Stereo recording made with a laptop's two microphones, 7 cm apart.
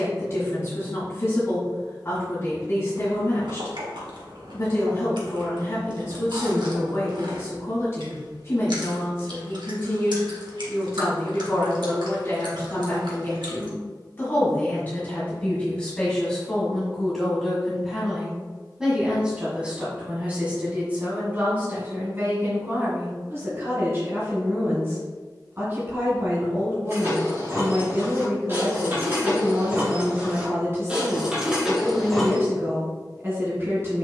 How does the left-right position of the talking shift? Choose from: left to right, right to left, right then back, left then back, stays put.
left to right.